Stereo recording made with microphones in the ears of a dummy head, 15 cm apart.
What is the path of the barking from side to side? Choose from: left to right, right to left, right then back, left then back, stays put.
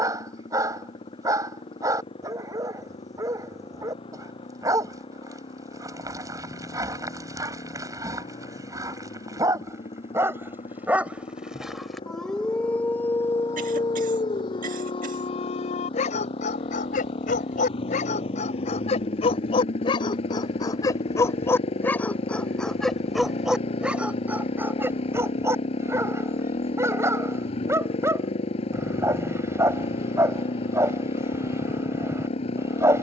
left then back.